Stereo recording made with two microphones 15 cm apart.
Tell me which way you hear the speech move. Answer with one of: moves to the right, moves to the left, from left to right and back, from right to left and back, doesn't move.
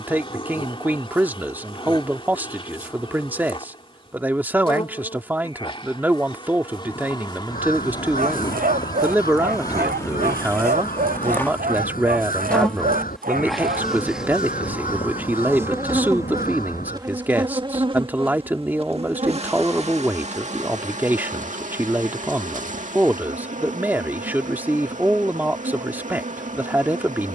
doesn't move.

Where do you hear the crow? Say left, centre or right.
left.